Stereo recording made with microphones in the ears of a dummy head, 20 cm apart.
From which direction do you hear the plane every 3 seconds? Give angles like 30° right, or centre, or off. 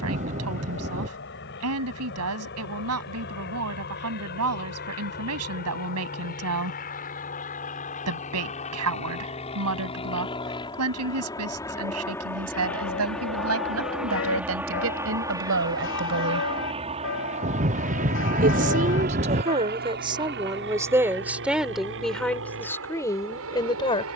50° left, 50° left, 40° left, 20° left, centre, 20° right, 40° right, 60° right.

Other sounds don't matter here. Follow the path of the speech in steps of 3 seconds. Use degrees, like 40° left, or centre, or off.
70° right, 70° right, 70° right, 70° right, 70° right, 60° right, 30° right, 10° left.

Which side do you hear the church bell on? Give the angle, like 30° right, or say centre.
60° left.